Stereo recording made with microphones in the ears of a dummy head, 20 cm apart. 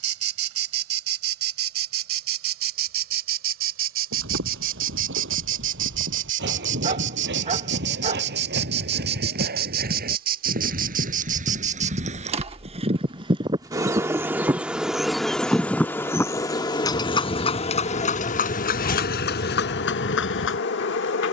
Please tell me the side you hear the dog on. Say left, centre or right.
right.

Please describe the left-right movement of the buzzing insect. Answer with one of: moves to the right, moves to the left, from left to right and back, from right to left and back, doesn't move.
moves to the left.